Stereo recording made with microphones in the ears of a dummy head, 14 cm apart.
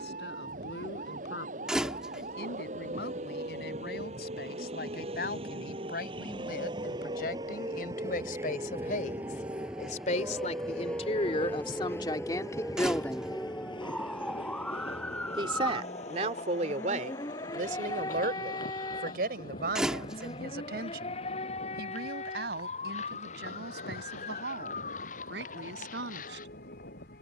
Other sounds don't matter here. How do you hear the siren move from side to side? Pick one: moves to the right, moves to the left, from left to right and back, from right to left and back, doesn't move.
moves to the left.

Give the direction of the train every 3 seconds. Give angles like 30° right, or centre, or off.
50° right, 40° right, 20° right, centre, 30° left, 50° left, 60° left, 70° left, 70° left.